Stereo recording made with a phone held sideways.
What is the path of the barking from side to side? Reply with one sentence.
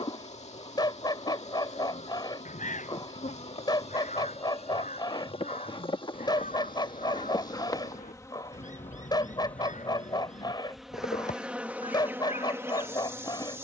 You can hear the barking stay put.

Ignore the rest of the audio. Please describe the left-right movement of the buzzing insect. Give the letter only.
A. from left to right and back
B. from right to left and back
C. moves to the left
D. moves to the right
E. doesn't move
D.